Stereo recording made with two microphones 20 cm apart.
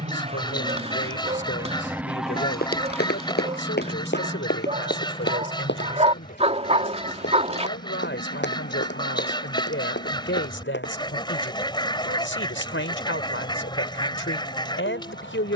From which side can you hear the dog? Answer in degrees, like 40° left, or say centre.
30° right.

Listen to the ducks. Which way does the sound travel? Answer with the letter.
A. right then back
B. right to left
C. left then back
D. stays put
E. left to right
D.